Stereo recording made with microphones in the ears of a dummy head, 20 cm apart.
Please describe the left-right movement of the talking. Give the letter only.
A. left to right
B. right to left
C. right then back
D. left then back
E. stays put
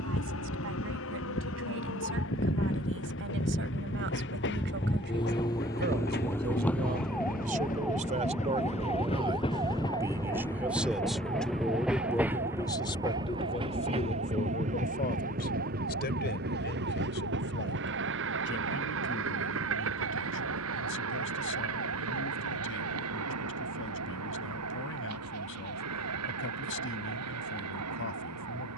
B.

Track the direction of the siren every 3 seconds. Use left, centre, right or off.
left, left, centre, right, right, right, right, right, right, right.